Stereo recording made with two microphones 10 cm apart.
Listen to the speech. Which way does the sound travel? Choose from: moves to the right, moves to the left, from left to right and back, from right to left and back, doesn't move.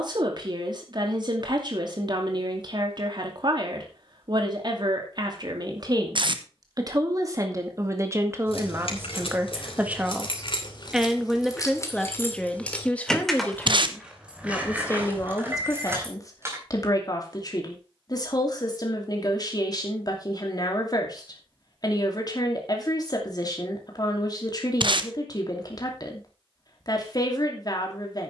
moves to the left.